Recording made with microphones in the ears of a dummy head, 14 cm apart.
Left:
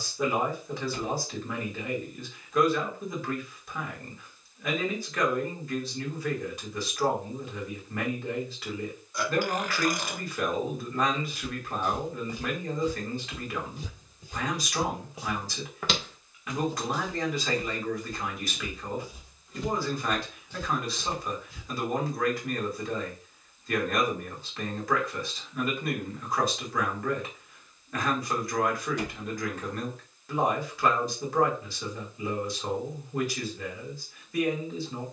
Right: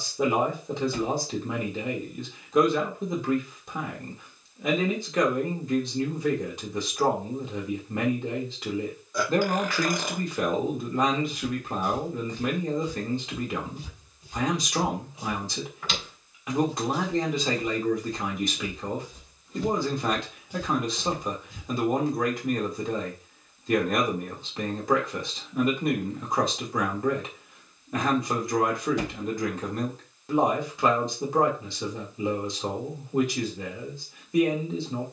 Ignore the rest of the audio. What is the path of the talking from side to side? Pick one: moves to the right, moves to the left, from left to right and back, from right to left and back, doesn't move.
doesn't move.